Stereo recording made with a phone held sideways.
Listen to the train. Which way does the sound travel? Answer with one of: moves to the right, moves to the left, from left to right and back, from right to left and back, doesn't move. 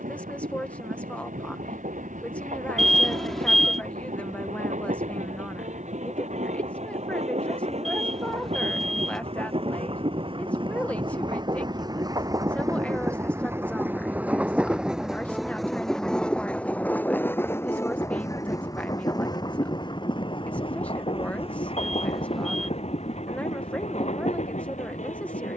moves to the left.